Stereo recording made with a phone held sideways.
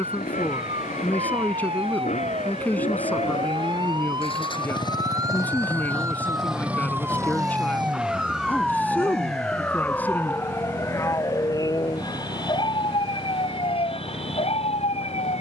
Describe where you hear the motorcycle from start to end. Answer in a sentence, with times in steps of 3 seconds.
You can hear the motorcycle on the left from 0 s and on the right from 6 s.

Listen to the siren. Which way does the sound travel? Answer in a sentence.
You can hear the siren move to the left.